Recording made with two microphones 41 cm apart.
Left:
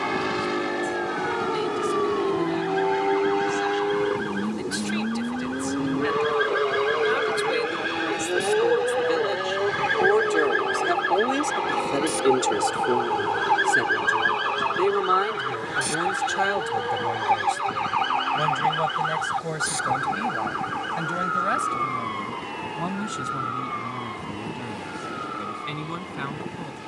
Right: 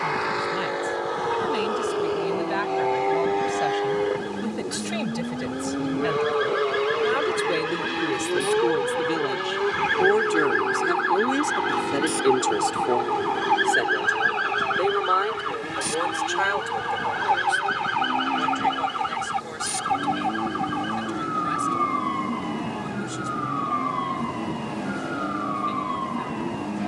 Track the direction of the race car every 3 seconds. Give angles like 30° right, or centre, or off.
40° left, 20° left, 10° right, 20° right, 30° right, 40° right, 40° right, 50° right, 50° right.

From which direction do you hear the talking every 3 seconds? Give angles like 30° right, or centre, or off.
80° right, 70° right, 60° right, 20° right, 20° left, 50° left, 60° left, 70° left, 70° left.